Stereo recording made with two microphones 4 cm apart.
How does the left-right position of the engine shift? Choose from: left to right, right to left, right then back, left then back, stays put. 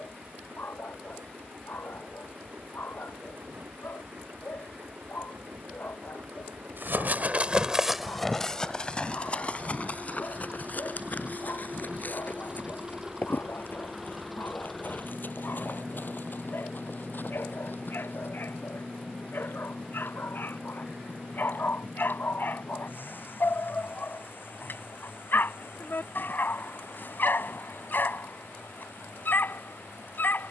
right to left.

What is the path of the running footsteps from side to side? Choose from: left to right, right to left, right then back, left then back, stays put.
right to left.